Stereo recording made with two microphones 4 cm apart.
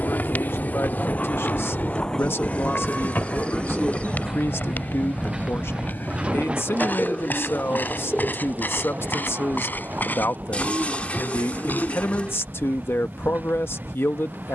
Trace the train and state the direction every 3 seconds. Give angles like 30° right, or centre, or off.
30° left, 10° right, 30° right, 40° right, 50° right.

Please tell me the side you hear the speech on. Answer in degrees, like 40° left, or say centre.
80° left.